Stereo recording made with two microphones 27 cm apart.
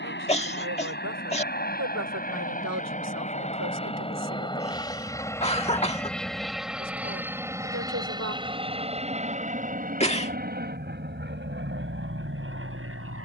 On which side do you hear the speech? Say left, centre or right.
right.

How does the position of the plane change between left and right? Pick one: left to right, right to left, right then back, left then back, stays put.
left to right.